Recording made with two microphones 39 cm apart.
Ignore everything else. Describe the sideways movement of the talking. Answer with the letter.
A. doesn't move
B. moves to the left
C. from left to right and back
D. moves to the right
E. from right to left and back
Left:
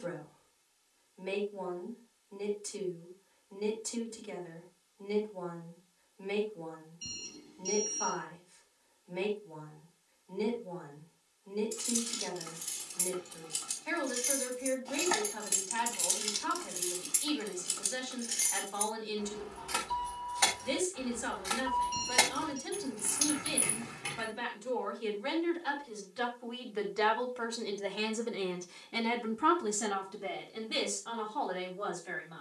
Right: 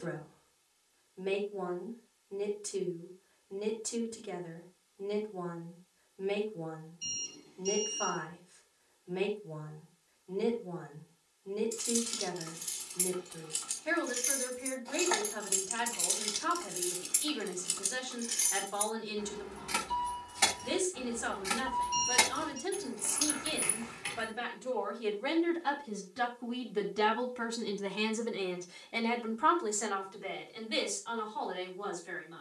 B.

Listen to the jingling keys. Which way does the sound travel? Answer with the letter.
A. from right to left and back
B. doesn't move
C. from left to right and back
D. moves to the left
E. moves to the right
C.